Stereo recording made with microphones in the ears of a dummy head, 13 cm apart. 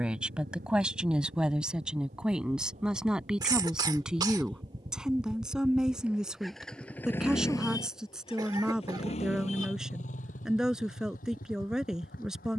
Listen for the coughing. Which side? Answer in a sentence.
In this clip you hear the coughing on the right.